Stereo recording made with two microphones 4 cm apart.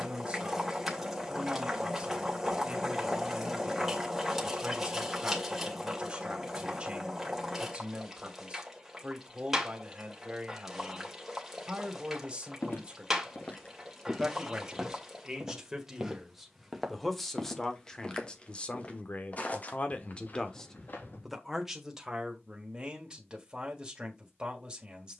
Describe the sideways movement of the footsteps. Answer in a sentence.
In this clip you hear the footsteps go right and come back.